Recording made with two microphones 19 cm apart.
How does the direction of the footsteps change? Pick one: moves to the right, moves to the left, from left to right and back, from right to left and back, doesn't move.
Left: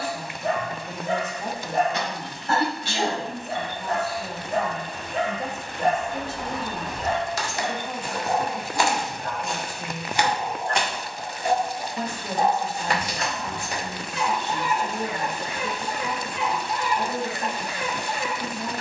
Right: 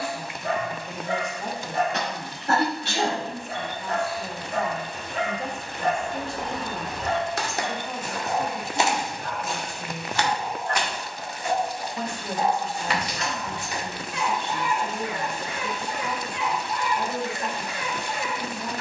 moves to the left.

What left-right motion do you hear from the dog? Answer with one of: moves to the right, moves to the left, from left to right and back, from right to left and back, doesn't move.
doesn't move.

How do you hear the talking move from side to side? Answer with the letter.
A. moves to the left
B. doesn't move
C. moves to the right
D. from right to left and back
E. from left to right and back
B.